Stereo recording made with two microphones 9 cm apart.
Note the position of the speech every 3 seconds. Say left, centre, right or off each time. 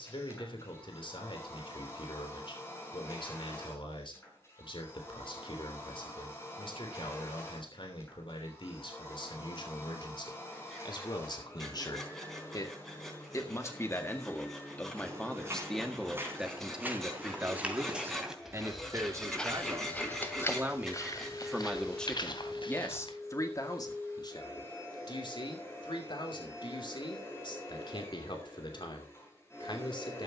left, left, left, left, left, centre, right, left, left, left.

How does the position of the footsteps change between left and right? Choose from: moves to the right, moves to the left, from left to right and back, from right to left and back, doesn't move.
moves to the left.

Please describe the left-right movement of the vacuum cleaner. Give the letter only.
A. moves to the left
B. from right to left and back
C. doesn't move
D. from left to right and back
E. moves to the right
C.